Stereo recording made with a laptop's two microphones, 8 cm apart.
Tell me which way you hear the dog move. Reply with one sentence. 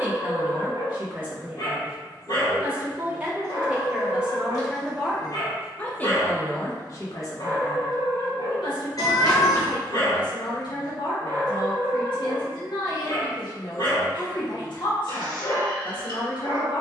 In this clip you hear the dog stay put.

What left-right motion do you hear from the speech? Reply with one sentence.
You can hear the speech move from right to left.